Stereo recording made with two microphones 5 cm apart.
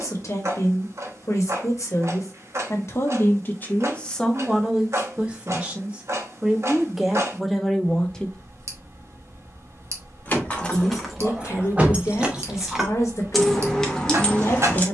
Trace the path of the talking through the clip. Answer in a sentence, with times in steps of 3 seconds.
You can hear the talking on the left from 0 s, in the centre from 3 s and on the left from 9 s.